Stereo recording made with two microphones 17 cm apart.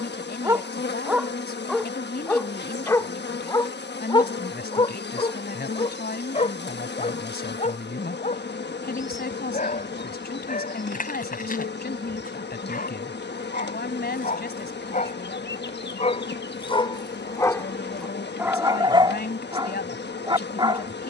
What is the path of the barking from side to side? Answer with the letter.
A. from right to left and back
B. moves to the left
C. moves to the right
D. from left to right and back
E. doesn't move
A.